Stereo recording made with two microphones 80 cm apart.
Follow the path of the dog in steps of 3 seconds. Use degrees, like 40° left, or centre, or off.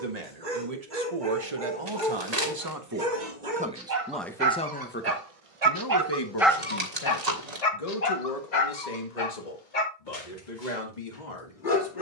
80° right, 60° right, 30° left, 70° left.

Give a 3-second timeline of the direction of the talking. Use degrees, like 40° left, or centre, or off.
40° right, 10° left, 40° left, 60° left.